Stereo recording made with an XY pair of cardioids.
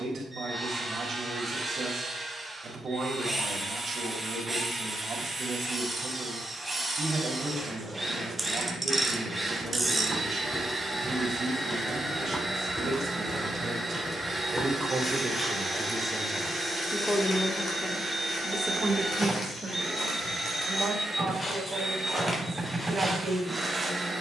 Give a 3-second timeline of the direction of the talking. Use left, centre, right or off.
right, right, right, right, right, centre, right, right.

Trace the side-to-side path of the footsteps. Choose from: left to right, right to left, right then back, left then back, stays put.
left then back.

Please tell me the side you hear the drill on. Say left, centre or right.
centre.